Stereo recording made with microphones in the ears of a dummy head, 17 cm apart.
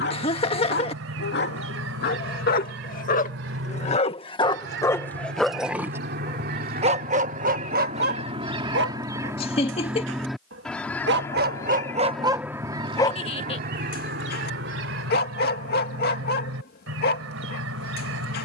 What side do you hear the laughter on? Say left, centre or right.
left.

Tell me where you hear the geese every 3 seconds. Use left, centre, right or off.
right, right, right, centre, right, right.